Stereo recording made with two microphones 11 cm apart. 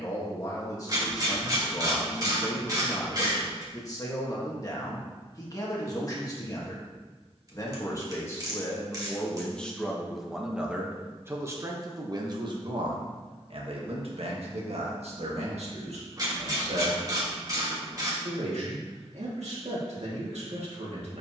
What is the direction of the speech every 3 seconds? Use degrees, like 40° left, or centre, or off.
30° left, 30° left, 30° left, 10° right, 60° right, 80° right, 80° right.